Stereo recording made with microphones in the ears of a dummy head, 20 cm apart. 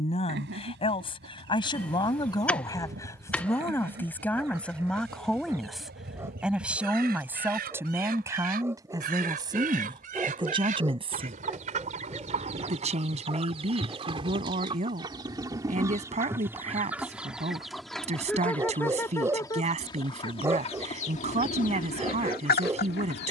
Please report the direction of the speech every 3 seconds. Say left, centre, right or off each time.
left, centre, centre, right, right, right, right, right.